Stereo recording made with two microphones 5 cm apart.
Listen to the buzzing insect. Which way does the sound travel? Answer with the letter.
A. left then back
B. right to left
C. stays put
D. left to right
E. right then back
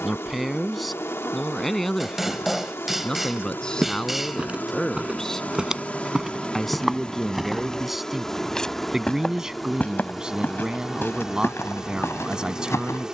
D.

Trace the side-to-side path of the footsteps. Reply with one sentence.
In this clip you hear the footsteps move to the left.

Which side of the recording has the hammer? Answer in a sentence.
You can hear the hammer in the centre.